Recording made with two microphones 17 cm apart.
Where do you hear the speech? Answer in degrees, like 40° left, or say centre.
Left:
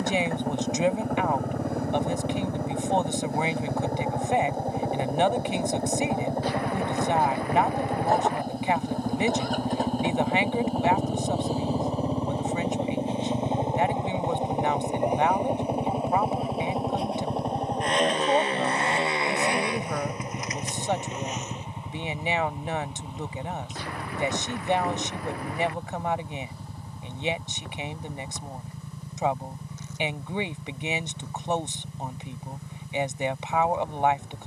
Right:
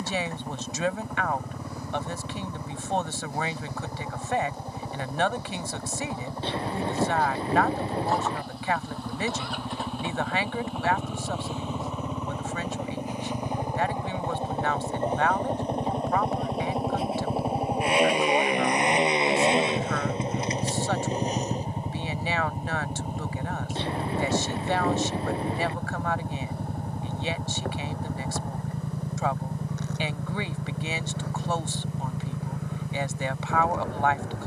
20° left.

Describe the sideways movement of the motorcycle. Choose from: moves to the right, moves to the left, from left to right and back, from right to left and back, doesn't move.
moves to the right.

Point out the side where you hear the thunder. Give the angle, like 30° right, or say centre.
30° right.